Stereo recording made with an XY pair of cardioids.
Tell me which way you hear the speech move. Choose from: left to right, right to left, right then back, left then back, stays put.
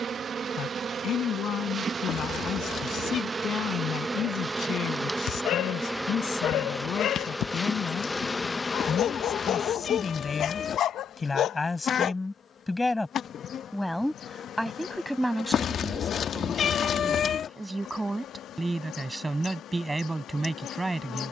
left to right.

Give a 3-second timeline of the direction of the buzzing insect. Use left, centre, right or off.
right, right, centre, left, left, left, left.